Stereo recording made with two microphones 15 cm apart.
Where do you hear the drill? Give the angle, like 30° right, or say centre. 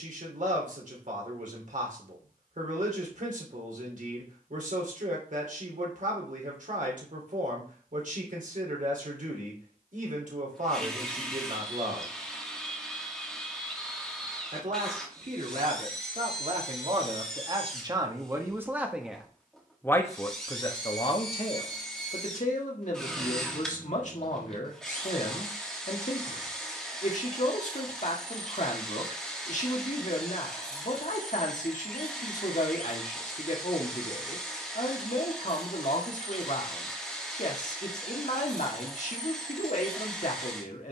centre.